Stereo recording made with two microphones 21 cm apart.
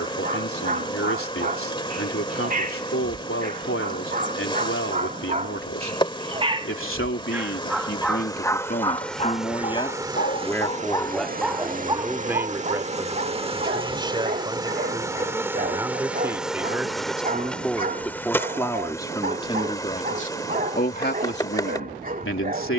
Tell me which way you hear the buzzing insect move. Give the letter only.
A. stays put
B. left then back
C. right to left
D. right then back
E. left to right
D.